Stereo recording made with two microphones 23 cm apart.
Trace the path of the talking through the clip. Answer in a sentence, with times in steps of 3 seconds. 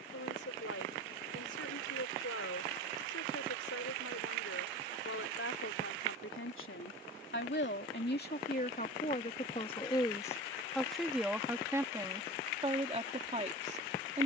You can hear the talking on the left from 0 s, in the centre from 9 s and on the right from 12 s.